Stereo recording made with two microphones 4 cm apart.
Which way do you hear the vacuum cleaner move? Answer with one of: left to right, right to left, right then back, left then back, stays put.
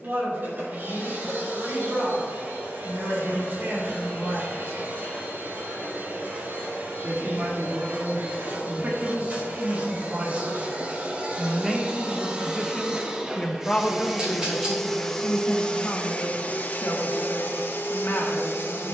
right to left.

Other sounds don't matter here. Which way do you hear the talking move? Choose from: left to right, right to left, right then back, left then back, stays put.
right to left.